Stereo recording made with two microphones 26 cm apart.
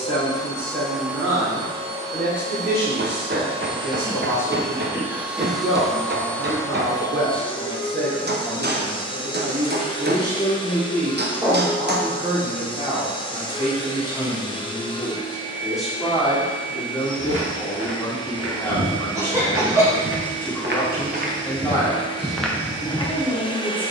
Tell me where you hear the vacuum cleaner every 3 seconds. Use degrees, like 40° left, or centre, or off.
10° right, 10° right, 20° left, 20° left, 20° left, 20° left, 20° left, 20° left.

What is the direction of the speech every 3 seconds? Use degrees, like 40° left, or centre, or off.
50° right, 50° right, 50° right, 30° right, 20° right, centre, 10° left, 10° left.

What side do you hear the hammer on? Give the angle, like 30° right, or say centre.
40° right.